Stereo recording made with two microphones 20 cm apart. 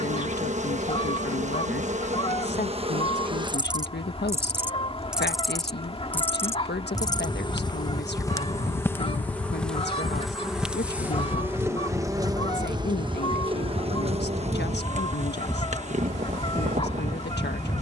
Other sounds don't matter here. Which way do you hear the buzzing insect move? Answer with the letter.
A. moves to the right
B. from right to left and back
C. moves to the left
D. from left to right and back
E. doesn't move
B.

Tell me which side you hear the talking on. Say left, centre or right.
left.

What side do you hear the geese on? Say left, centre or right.
left.